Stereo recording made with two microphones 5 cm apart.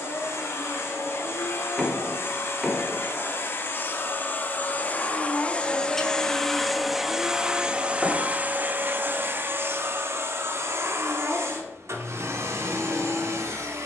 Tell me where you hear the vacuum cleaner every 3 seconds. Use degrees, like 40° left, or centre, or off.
60° left, 40° left, 10° right, 60° right, 70° right.